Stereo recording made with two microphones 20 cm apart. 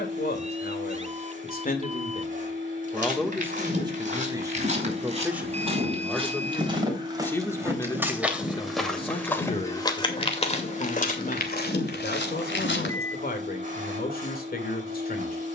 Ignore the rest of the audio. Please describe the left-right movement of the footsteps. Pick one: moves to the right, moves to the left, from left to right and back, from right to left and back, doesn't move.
moves to the left.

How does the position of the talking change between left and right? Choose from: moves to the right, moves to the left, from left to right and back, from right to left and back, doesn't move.
from left to right and back.